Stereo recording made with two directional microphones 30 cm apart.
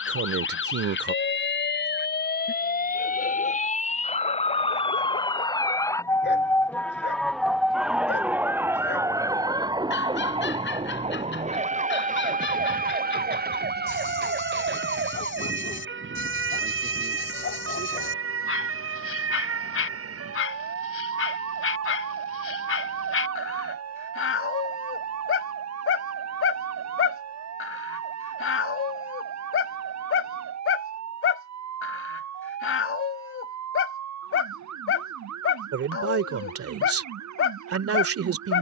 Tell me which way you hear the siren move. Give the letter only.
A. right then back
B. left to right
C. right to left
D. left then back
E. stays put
B.